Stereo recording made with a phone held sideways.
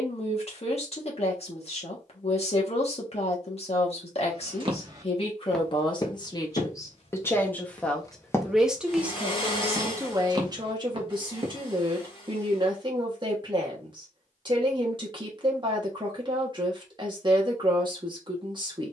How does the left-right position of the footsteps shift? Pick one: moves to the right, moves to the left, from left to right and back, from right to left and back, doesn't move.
from right to left and back.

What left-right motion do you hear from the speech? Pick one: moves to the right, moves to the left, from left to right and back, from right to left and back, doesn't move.
moves to the right.